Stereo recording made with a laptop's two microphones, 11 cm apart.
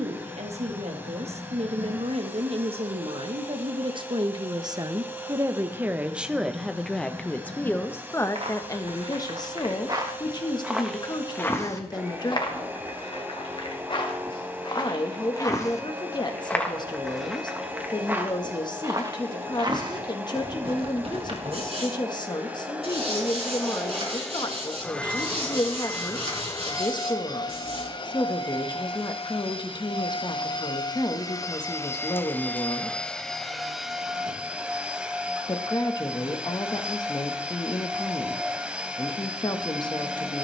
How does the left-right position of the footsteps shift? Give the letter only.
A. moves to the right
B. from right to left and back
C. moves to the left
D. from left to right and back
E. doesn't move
B.